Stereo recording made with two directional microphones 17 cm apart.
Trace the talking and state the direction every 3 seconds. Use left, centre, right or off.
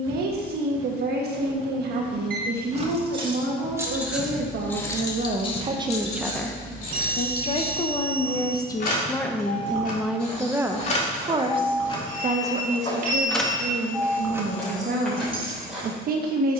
right, right, left, centre, right, right.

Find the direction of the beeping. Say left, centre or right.
right.